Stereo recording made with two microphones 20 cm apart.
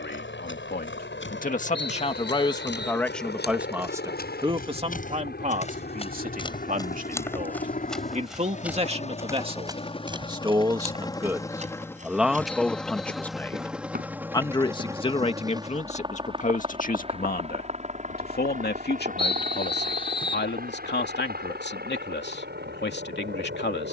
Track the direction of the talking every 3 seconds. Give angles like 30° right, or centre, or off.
40° left, 20° right, 40° right, 20° right, 10° left, 40° left, 60° left, 60° left.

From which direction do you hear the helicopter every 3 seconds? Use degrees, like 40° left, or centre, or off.
60° left, 60° left, 40° left, 20° left, centre, 20° right, 40° right, 50° right.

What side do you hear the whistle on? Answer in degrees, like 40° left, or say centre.
30° left.